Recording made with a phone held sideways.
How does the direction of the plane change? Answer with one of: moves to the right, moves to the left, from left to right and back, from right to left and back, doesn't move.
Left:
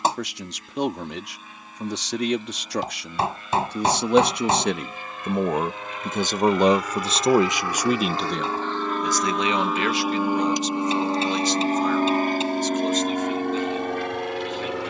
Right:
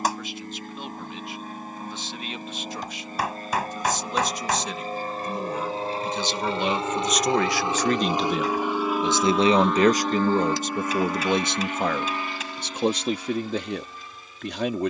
moves to the left.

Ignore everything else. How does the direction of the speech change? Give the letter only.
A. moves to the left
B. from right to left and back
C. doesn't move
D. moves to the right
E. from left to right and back
D.